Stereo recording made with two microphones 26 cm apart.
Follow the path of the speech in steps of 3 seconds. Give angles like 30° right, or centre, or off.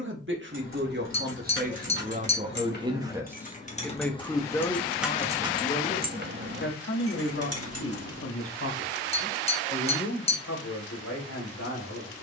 40° right, 10° left, 50° left, 70° left.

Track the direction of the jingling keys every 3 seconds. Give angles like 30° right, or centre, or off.
50° left, 10° left, 60° right, off.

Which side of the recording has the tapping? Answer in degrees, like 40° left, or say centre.
20° left.